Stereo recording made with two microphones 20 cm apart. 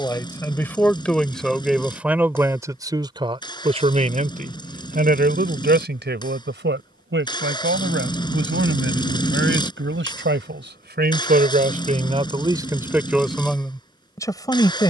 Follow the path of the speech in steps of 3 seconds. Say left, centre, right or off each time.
centre, right, right, right, centre.